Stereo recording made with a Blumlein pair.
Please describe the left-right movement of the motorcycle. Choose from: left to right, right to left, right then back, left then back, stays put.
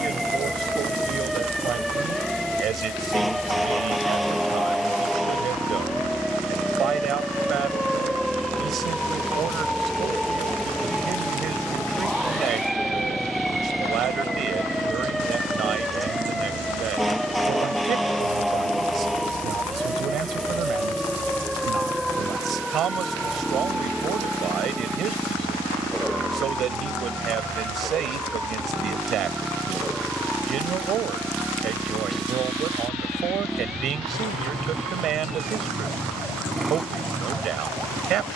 stays put.